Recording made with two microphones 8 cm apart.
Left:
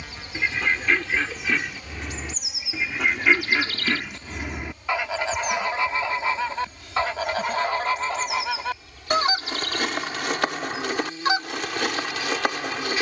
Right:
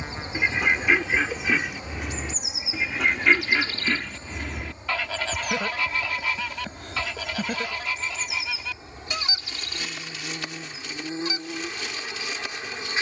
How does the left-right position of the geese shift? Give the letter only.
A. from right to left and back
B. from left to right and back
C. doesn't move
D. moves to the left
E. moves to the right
D.